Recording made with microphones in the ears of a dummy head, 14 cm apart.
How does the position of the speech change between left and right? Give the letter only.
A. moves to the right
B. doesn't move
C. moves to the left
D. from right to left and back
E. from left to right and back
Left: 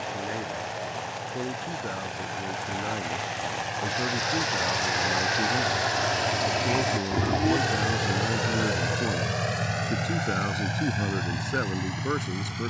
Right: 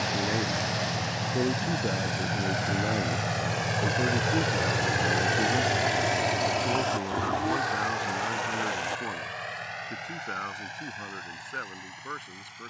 C.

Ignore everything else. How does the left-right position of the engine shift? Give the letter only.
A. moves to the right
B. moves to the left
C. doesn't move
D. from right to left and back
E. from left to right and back
B.